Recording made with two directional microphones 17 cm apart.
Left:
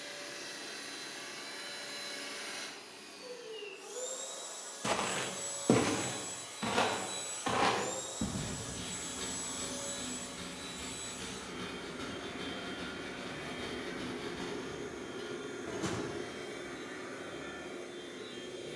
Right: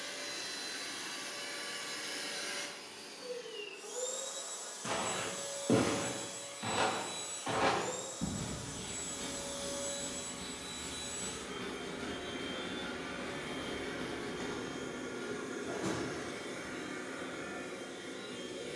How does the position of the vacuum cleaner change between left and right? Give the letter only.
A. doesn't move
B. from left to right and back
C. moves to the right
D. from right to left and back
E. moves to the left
D.